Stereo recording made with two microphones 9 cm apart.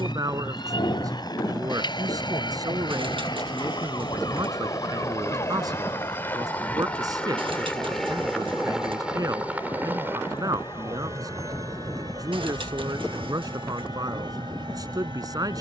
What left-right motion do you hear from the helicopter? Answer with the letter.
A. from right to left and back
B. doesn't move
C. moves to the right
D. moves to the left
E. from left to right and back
C.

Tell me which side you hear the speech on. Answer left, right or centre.
right.